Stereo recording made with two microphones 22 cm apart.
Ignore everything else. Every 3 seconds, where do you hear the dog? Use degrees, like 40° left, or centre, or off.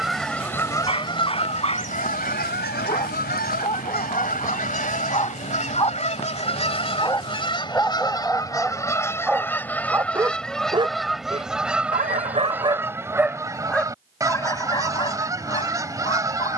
30° left, 30° left, 10° left, 20° right, 10° right, 30° left.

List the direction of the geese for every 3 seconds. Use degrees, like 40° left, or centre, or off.
30° left, 40° left, 20° left, centre, 10° right, 20° right.